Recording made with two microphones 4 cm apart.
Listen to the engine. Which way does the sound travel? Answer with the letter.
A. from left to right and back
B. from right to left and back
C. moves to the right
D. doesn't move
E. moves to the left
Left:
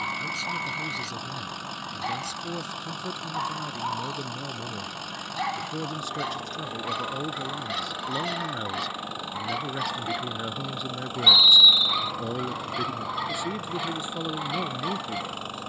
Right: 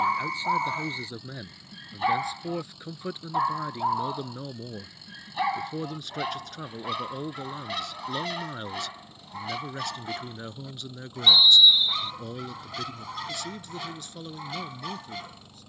D.